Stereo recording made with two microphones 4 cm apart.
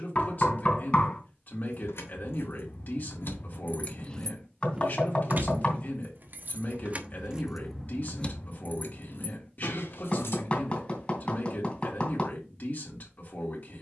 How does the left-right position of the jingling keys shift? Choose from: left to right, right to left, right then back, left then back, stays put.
right then back.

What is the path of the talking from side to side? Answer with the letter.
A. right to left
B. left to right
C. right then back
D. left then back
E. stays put
E.